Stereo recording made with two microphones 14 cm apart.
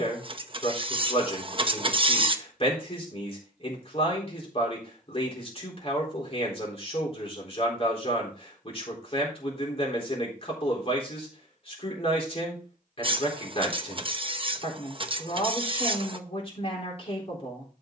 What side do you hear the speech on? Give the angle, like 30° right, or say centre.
40° left.